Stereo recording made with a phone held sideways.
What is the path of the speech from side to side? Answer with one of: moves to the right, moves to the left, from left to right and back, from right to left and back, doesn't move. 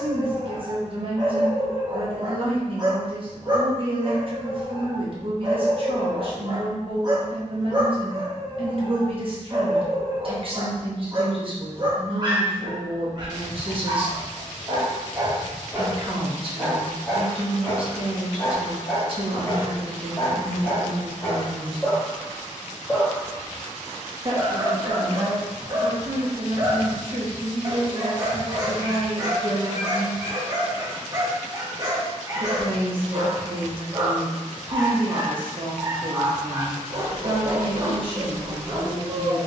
doesn't move.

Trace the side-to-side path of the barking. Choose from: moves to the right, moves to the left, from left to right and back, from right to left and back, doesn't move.
from right to left and back.